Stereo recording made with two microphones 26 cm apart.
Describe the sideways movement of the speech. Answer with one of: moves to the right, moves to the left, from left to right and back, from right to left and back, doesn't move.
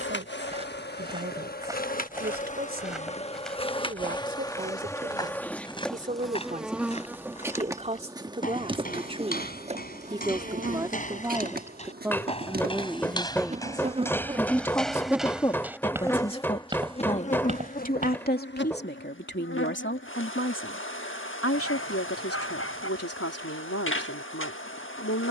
moves to the left.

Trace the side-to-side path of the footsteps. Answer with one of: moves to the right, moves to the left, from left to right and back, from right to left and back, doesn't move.
from right to left and back.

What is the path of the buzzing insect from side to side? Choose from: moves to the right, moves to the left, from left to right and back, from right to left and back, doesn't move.
from left to right and back.